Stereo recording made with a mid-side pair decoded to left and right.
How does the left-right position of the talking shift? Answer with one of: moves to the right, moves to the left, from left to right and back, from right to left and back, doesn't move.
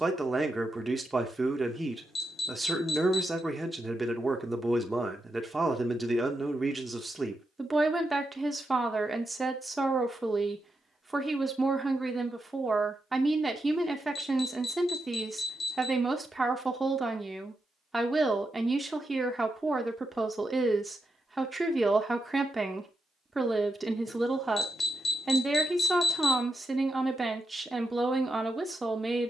doesn't move.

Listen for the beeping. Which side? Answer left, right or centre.
left.